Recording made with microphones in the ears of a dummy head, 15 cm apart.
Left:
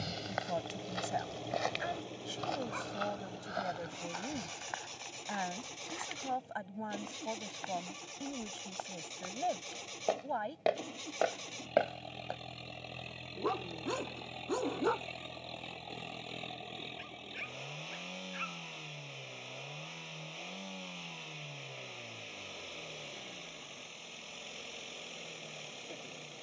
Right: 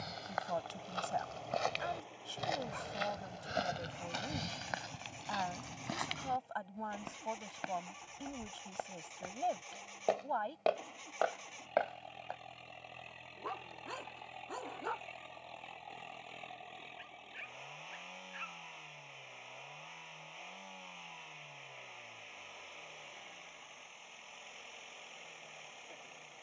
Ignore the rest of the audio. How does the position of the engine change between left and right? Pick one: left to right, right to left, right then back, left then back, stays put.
stays put.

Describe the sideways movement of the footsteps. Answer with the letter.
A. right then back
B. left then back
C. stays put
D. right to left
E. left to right
A.